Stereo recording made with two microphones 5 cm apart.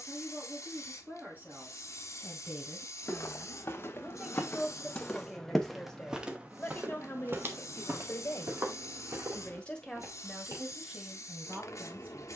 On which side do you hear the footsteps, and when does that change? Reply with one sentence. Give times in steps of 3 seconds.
You can hear the footsteps not at all from 0 s, on the left from 3 s and on the right from 6 s.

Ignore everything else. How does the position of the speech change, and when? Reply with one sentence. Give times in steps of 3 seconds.
You can hear the speech on the right from 0 s, in the centre from 3 s, on the left from 6 s and in the centre from 9 s.